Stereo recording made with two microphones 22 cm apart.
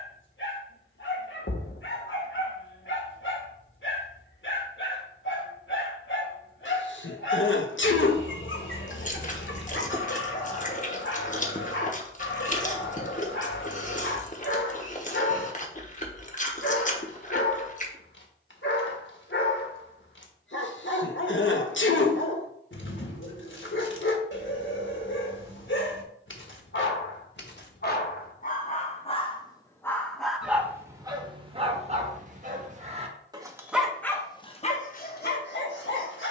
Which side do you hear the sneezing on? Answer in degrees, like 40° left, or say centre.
60° left.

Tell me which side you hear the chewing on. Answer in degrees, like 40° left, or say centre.
40° left.